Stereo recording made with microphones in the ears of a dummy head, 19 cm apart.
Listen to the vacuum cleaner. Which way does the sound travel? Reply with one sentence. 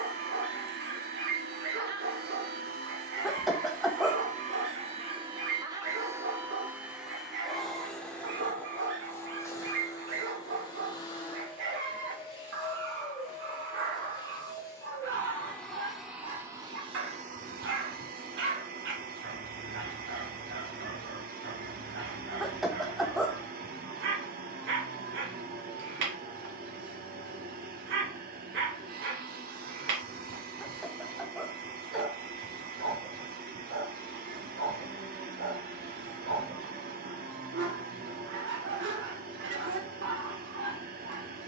You can hear the vacuum cleaner move from right to left and back again.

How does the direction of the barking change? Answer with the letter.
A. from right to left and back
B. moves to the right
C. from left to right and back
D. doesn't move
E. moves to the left
D.